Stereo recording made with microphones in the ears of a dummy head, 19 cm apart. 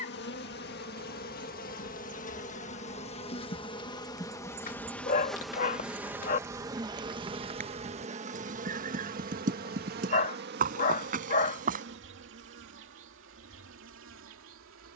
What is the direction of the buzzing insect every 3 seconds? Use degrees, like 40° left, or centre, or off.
40° left, 10° left, 30° right, 50° right, 60° right.